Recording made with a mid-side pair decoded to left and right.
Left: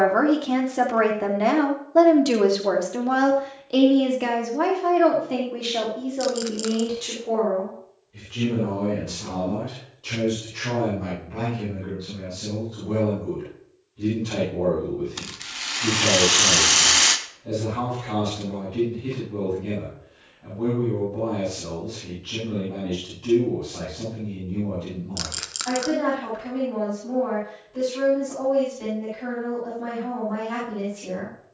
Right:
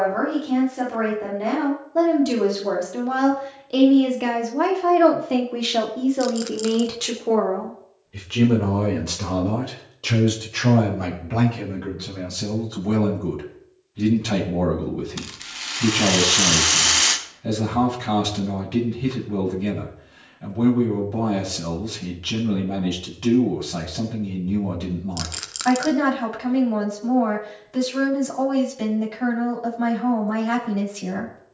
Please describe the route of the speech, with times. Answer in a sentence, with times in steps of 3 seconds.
You can hear the speech on the left from 0 s, in the centre from 3 s and on the right from 6 s.